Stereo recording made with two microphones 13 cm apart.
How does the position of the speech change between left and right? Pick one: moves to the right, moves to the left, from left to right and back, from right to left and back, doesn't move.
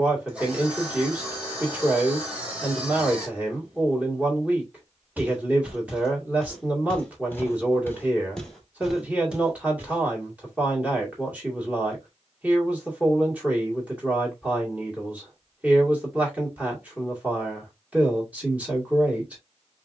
doesn't move.